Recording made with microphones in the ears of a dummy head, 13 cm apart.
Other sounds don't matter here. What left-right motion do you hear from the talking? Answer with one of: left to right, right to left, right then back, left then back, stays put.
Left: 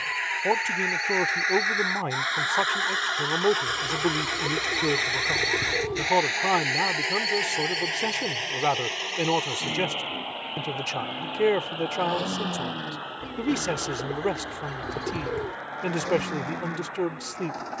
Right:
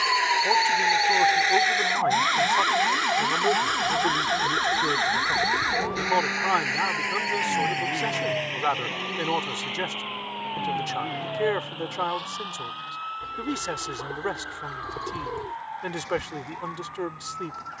stays put.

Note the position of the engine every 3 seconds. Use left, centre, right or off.
right, centre, left, left, left, left.